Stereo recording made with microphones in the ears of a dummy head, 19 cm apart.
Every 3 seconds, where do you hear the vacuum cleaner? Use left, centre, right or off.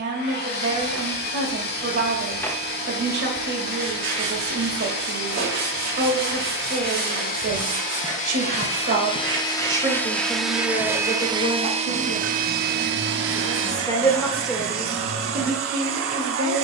left, left, left, centre, right, right.